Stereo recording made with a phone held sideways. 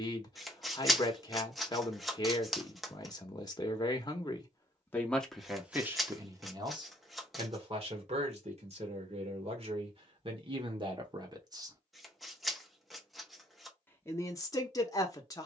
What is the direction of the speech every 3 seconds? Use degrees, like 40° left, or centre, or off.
30° left, 20° left, 40° right, 40° right, 20° left.